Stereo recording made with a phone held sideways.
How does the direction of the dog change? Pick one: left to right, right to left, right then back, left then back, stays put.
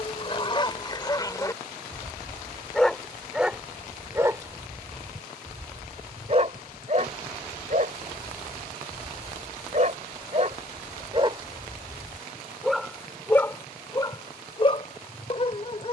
right then back.